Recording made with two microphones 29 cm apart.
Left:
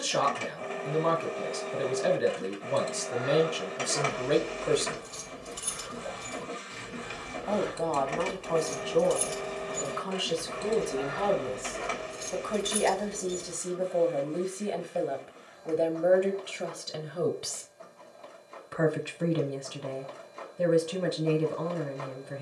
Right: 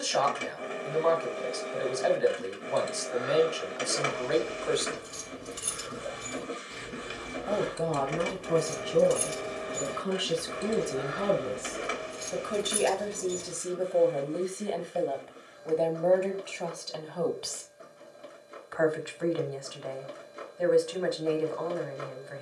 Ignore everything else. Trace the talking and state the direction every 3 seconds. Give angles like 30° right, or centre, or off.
40° left, 40° left, 10° right, 20° right, centre, 20° left, 40° left, 40° left.